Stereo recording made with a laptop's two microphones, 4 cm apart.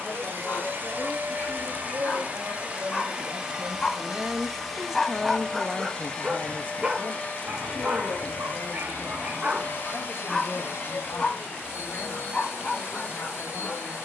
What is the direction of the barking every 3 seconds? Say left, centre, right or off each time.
left, centre, right, centre, left.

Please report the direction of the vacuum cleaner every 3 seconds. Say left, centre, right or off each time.
right, centre, left, left, left.